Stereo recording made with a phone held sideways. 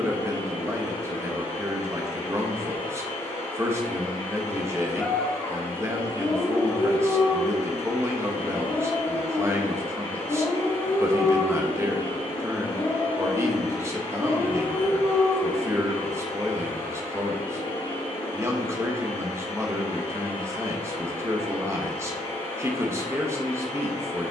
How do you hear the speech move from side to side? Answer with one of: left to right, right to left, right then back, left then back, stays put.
stays put.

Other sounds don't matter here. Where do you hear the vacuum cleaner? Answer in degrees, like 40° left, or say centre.
40° left.